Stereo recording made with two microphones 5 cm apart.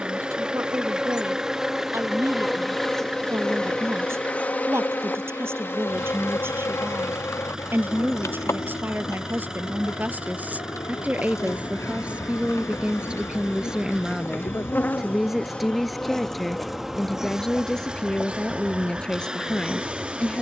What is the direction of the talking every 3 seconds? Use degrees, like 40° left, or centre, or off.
60° right, 50° right, 50° right, 30° right, 20° right, centre, 10° left.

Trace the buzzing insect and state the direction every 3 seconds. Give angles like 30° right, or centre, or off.
10° right, 30° left, 60° left, 80° left, 50° left, centre, 30° right.